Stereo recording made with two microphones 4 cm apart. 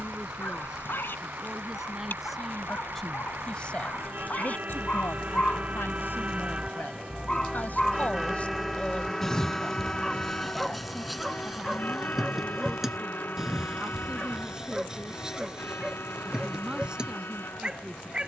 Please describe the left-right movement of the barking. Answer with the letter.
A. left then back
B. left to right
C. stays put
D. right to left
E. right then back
B.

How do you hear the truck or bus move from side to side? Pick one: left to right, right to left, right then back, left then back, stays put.
right to left.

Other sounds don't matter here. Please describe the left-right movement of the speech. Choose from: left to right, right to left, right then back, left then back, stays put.
left then back.